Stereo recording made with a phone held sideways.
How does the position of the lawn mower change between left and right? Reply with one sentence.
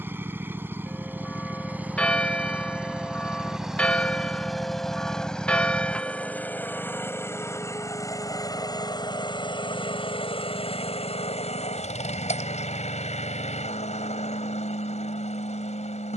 You can hear the lawn mower travel towards the left.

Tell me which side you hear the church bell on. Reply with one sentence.
You can hear the church bell in the centre.